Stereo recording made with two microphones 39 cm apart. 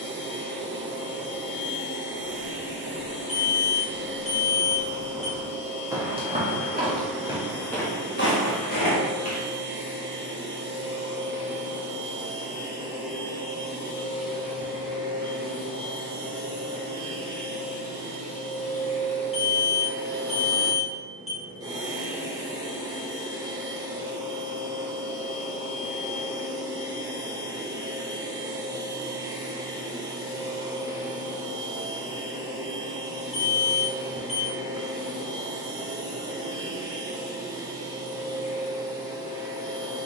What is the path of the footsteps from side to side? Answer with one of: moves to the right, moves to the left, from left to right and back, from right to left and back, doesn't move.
from left to right and back.